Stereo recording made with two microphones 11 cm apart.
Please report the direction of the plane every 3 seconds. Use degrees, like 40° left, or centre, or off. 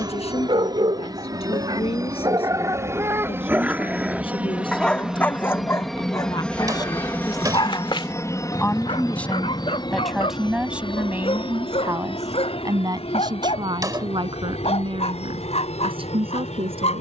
30° right, 10° right, 20° left, 40° left, 60° left, 70° left.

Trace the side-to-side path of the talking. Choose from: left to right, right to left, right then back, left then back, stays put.
left to right.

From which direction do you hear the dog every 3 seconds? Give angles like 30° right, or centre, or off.
40° right, centre, 40° left, 60° left, 70° left, 70° left.